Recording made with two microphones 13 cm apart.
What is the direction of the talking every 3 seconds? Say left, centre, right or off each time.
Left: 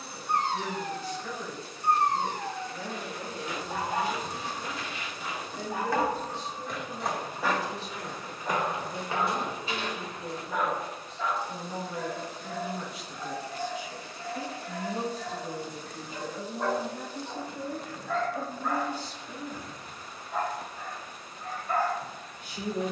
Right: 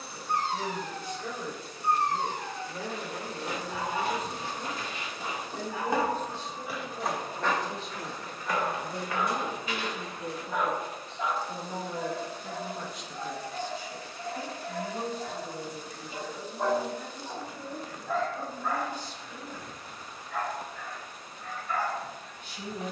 right, right, right, right, centre, left, left, left.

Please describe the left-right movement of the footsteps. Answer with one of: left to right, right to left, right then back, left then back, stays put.
right to left.